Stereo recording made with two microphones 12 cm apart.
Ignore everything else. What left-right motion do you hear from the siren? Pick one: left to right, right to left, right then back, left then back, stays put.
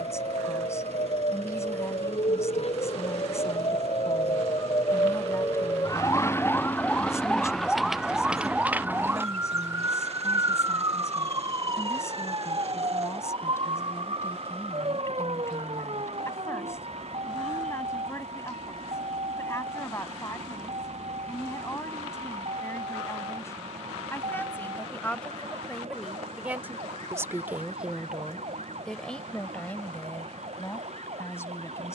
left to right.